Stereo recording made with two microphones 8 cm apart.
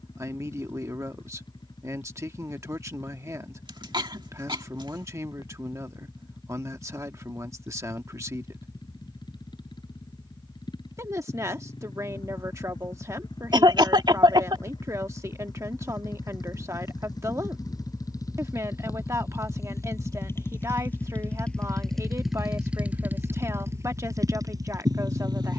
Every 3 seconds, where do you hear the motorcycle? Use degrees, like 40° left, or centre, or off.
70° left, 70° left, 70° left, 70° left, 60° left, 60° left, 40° left, 10° right, 50° right.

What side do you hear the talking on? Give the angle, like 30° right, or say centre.
40° right.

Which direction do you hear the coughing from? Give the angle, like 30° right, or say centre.
70° right.